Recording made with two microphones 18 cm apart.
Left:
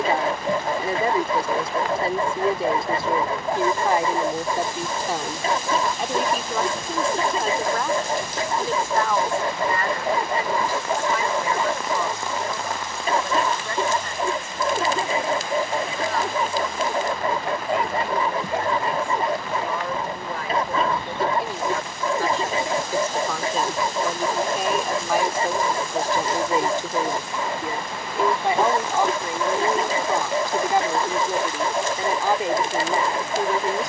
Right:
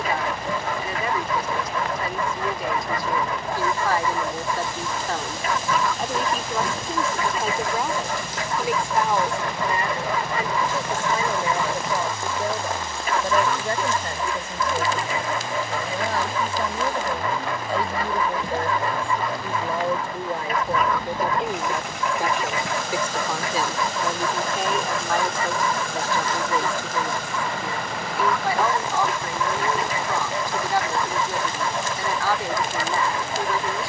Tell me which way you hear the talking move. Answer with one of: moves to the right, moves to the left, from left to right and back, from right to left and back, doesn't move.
from left to right and back.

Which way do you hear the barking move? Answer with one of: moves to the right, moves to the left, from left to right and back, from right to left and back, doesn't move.
doesn't move.